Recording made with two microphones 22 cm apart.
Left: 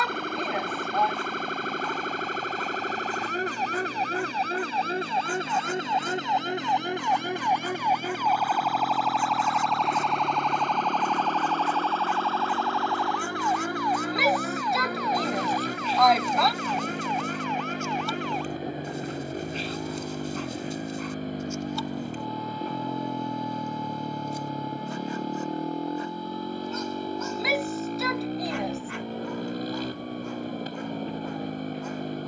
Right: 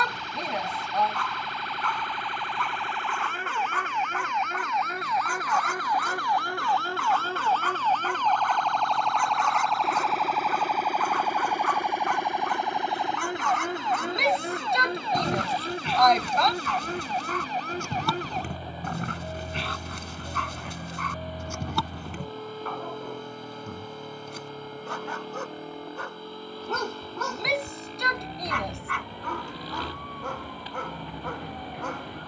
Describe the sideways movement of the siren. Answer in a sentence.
In this clip you hear the siren travel towards the right.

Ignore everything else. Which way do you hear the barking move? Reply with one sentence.
You can hear the barking stay put.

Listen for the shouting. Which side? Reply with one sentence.
You can hear the shouting in the centre.